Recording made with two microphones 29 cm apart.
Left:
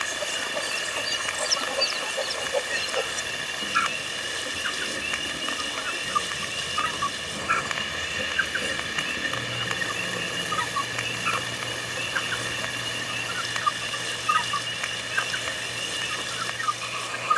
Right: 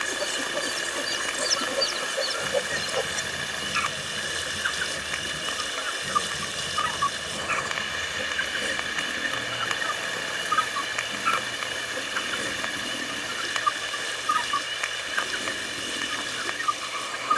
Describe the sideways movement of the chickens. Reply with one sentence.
In this clip you hear the chickens move from right to left and back again.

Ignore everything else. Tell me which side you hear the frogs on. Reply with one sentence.
You can hear the frogs on the left.